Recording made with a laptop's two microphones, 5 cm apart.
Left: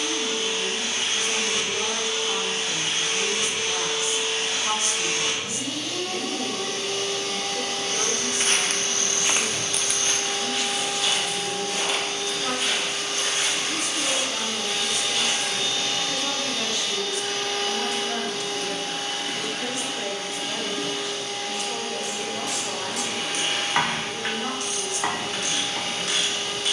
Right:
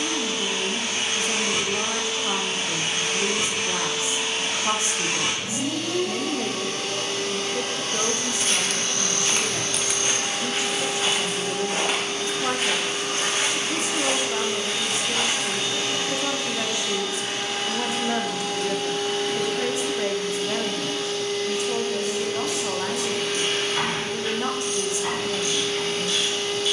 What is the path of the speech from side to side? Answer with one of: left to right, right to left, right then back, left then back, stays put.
stays put.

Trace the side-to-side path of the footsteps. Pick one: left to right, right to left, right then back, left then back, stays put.
left to right.